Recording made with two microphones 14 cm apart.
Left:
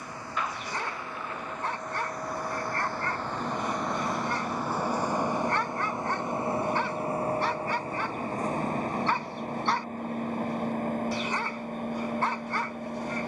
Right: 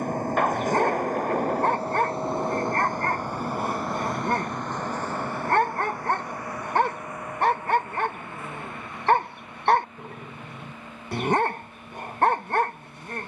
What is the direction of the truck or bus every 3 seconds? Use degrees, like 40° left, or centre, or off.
40° right, centre, 30° left, 50° left, 50° left.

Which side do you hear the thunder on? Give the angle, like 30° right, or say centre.
60° right.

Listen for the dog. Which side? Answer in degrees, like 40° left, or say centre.
60° right.